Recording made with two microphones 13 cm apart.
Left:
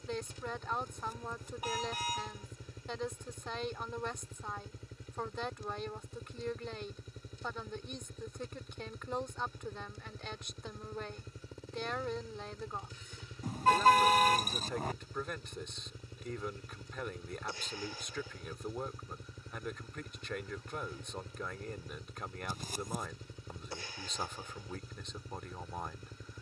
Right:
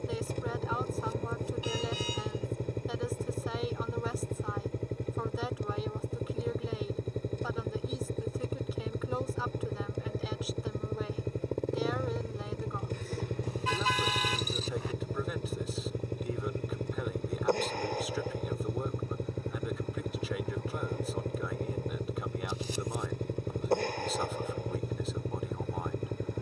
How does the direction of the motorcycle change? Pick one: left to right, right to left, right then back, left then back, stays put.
stays put.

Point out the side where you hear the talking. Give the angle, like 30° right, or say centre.
centre.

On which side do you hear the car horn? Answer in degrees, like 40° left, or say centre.
50° left.